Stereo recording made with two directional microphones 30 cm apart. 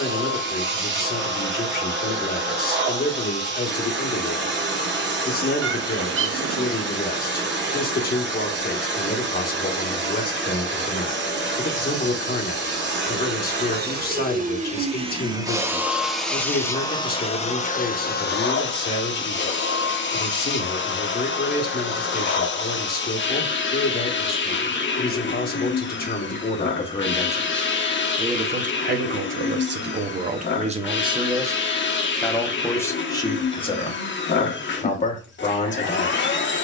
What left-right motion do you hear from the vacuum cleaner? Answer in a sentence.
You can hear the vacuum cleaner go from the right side to the left.